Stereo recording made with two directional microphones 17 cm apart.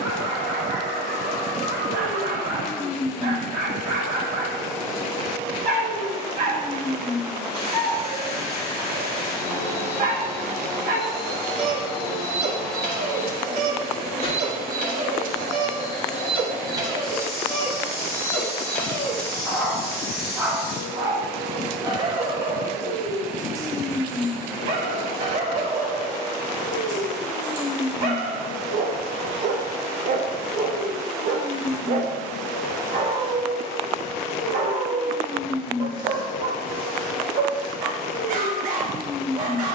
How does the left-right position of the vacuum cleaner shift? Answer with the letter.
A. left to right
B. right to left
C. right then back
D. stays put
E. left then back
D.